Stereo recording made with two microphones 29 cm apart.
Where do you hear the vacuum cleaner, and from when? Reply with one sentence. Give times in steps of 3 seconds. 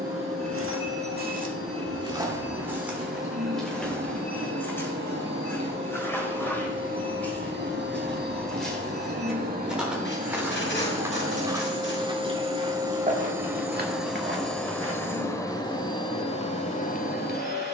In this clip you hear the vacuum cleaner on the right from 0 s, in the centre from 12 s and on the left from 15 s.